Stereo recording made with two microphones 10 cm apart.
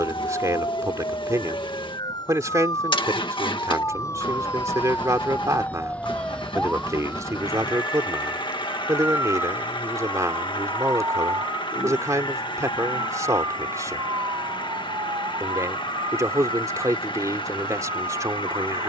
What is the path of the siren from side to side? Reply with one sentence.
In this clip you hear the siren move to the right.